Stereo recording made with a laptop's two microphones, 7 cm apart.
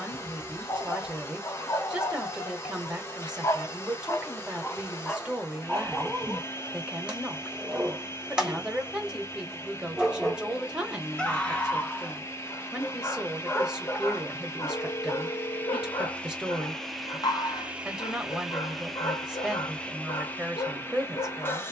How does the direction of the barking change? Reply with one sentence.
You can hear the barking go right and come back.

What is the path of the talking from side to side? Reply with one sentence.
You can hear the talking stay put.